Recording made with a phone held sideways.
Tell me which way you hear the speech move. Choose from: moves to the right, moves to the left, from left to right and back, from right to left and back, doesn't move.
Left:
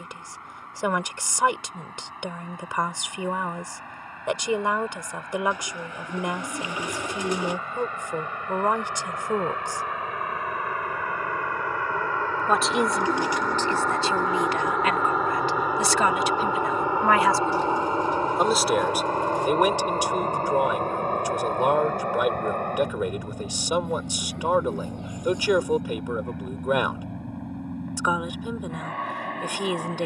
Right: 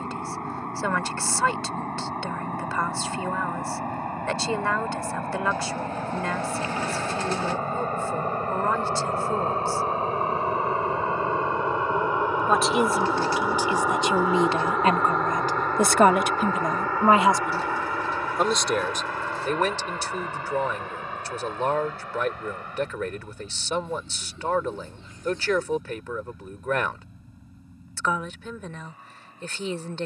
from left to right and back.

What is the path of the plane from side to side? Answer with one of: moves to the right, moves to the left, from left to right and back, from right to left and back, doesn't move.
moves to the left.